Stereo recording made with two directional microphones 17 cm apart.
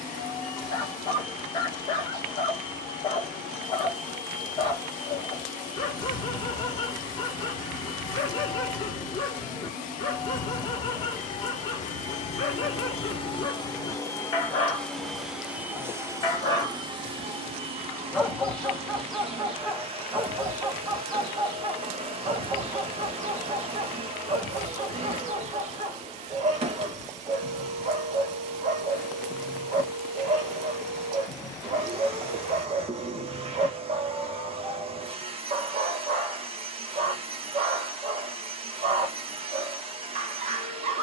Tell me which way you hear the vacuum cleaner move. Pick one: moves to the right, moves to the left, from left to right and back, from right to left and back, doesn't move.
moves to the right.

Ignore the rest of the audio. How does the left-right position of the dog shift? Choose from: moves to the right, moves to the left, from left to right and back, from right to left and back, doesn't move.
moves to the right.